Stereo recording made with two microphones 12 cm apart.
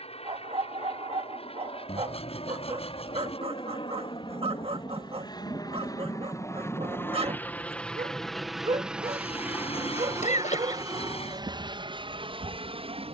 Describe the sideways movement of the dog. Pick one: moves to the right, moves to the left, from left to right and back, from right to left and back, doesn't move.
doesn't move.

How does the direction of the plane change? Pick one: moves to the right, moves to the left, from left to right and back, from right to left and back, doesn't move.
moves to the right.